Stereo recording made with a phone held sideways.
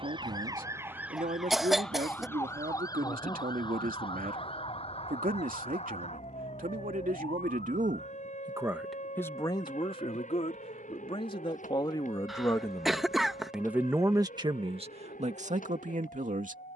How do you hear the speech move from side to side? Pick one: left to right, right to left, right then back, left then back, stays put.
left then back.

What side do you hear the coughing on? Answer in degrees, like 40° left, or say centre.
centre.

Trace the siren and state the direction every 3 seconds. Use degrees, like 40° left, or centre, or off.
centre, 40° left, 50° left, 60° left, 60° left, 60° left.